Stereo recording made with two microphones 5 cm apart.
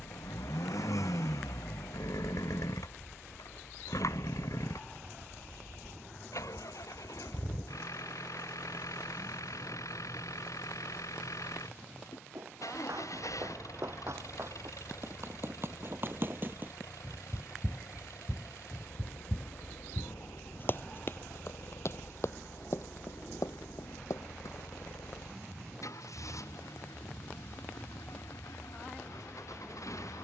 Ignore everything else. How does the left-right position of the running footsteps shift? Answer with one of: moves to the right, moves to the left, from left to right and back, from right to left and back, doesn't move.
moves to the left.